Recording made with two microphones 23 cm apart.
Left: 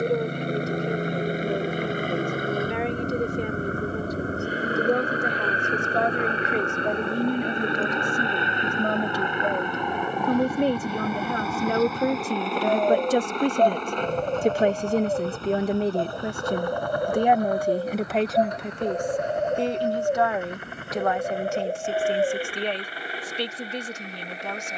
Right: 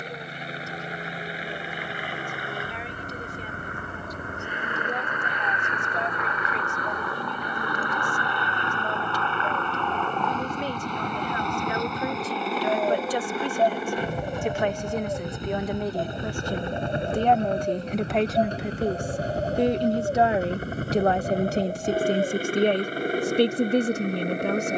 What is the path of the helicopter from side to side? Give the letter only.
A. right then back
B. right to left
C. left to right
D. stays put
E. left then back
C.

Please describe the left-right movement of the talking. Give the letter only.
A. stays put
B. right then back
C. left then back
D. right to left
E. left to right
E.